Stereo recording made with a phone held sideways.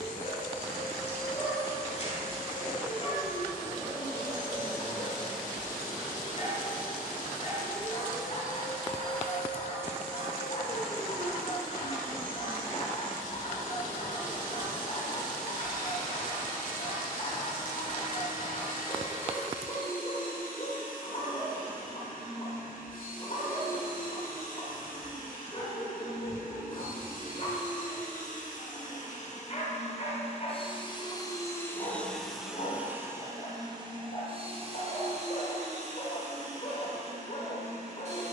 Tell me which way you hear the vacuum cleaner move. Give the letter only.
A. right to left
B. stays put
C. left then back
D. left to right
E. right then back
D.